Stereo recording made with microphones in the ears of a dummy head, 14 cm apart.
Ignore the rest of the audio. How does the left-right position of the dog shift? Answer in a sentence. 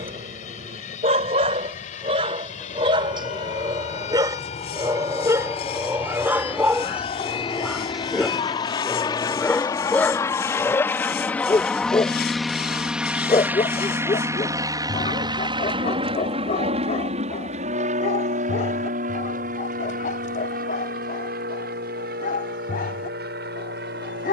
You can hear the dog go from the right side to the left.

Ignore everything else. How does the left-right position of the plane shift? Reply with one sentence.
In this clip you hear the plane travel towards the right.